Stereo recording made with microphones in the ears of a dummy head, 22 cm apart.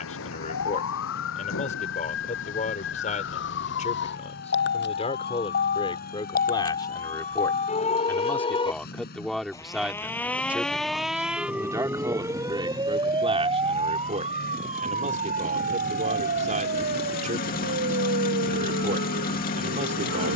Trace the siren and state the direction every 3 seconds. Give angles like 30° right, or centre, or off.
60° left, 50° left, 30° left, centre, 20° right, 40° right, 50° right.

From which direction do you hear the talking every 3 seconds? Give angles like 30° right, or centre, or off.
30° left, 30° left, 10° left, 10° right, 20° right, 30° right, 30° right.